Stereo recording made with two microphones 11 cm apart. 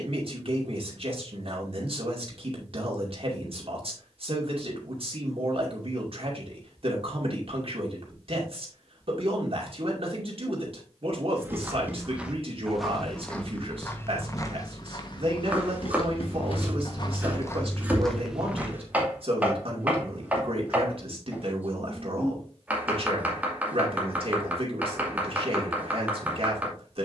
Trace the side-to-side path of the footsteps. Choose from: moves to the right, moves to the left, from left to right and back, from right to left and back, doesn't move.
from right to left and back.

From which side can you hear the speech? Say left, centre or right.
right.